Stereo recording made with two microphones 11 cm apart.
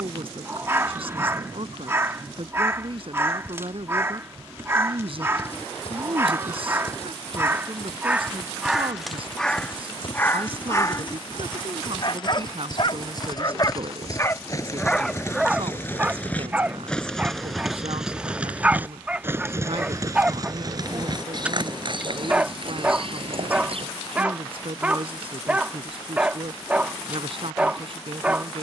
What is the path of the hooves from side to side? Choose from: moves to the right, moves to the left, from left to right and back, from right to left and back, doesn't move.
moves to the right.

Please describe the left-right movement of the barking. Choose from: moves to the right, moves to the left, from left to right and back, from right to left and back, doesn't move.
from right to left and back.